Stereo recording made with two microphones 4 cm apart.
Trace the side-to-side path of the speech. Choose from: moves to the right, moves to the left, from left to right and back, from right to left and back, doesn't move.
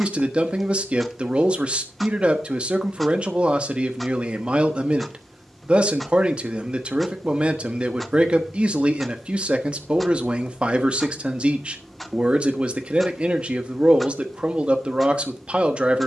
doesn't move.